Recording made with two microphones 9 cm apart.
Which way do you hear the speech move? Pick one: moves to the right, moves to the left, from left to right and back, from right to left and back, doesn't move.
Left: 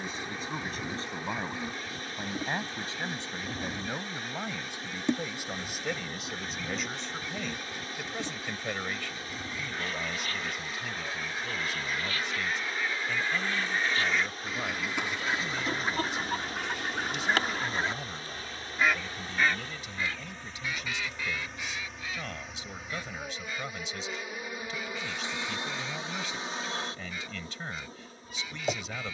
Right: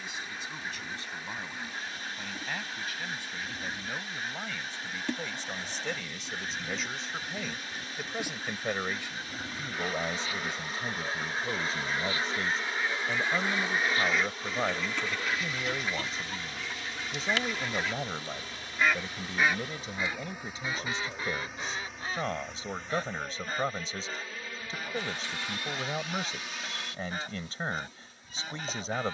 moves to the right.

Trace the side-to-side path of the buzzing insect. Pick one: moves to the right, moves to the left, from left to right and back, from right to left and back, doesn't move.
from left to right and back.